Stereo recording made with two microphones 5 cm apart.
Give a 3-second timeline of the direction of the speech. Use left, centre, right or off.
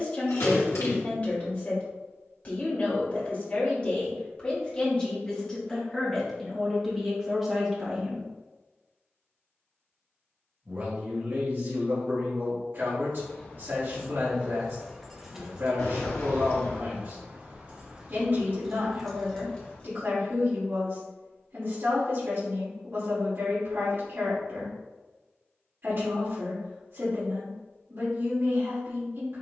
left, left, centre, right, right, right, right, right, right, right.